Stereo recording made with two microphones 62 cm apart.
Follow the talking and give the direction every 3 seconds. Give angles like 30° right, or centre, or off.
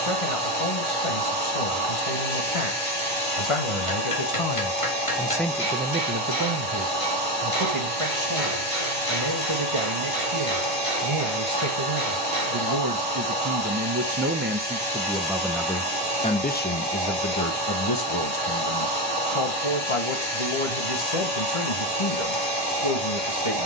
60° left, 30° left, 50° right, 50° right, 30° right, 10° left, 50° left, 60° left.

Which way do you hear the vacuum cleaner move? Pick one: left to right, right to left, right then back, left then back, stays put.
stays put.